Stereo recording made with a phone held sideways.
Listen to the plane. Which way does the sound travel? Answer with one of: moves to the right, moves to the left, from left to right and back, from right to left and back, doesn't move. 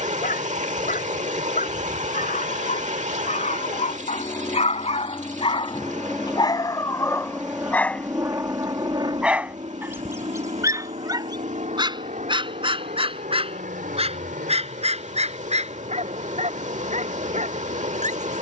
moves to the right.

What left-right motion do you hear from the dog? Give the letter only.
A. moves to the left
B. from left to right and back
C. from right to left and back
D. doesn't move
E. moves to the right
E.